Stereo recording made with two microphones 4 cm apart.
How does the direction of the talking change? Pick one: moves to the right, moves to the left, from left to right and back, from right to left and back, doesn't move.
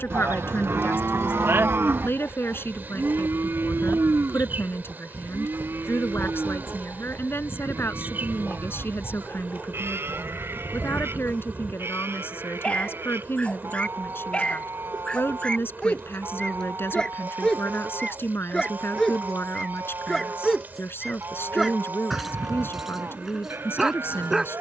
doesn't move.